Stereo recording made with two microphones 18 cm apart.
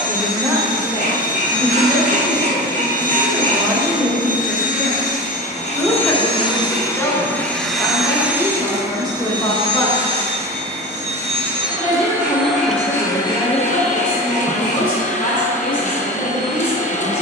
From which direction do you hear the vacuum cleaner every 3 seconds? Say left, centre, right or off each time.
left, left, centre, right, left, left.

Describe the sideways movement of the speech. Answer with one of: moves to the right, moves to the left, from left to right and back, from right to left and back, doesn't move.
moves to the left.